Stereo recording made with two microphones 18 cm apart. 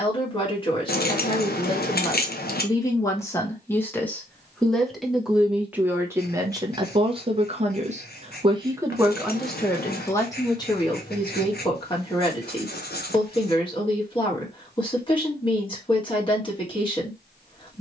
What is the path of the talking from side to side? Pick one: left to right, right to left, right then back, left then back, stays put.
right then back.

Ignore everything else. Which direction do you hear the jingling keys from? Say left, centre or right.
left.